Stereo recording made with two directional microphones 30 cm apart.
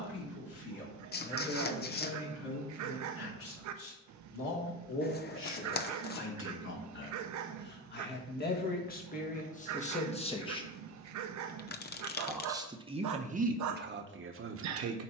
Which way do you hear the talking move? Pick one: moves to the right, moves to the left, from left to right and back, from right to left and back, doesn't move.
moves to the right.